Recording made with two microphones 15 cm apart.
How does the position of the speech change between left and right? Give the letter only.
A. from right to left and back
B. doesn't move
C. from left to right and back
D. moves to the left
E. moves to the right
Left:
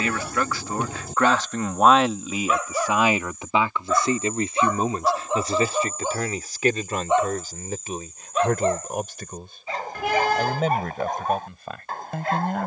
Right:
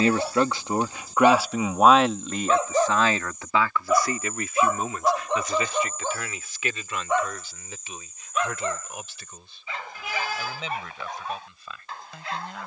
D.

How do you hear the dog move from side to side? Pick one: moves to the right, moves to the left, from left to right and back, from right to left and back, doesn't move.
moves to the left.